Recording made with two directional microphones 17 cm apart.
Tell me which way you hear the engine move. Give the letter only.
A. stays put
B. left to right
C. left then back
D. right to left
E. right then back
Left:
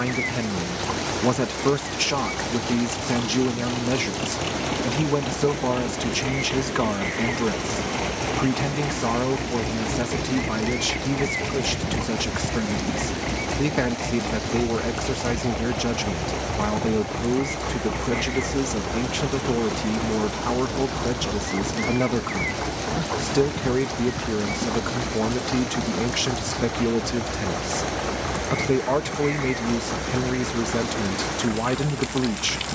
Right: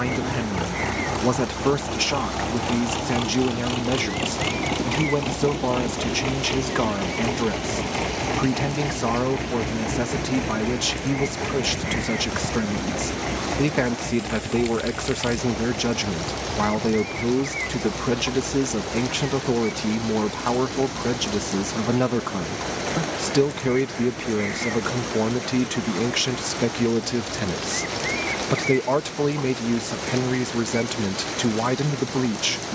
D.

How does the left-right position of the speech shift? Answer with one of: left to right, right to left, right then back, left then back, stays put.
stays put.